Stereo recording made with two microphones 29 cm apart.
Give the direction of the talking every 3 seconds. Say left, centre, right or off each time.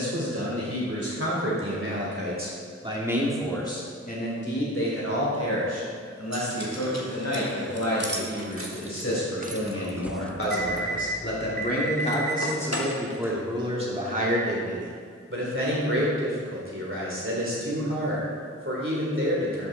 right, left, left, left, centre, right, right.